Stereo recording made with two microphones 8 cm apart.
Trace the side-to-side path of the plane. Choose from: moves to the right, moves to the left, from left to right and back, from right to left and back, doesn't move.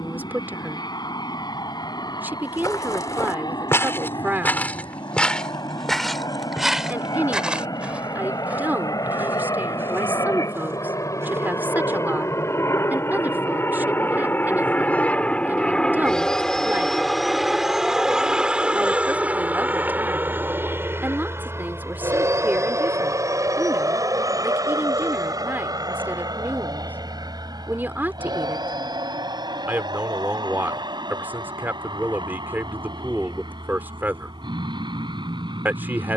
moves to the right.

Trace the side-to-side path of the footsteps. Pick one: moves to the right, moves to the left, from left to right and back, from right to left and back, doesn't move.
moves to the right.